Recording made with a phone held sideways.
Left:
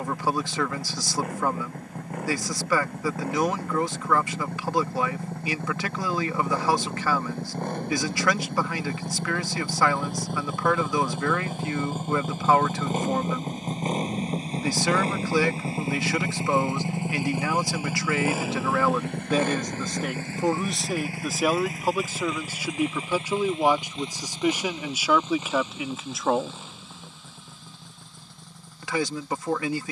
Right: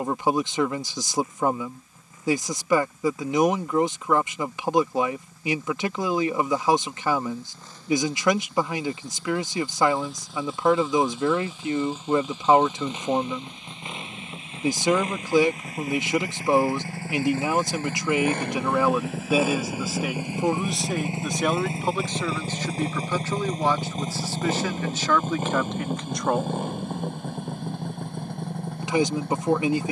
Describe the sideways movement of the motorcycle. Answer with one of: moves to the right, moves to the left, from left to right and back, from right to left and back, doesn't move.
moves to the right.